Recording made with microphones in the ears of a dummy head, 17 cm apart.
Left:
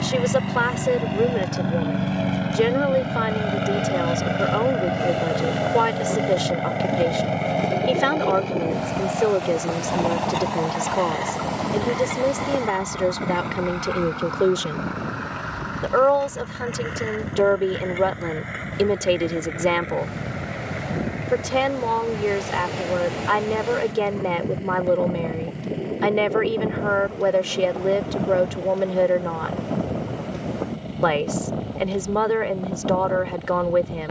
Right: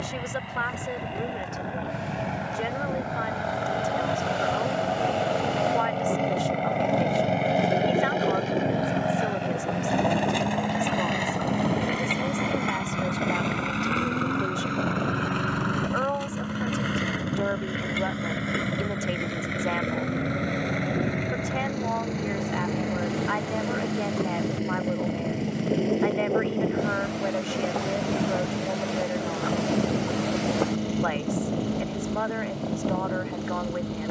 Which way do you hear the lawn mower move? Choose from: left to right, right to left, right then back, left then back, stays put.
left to right.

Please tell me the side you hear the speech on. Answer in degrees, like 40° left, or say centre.
70° left.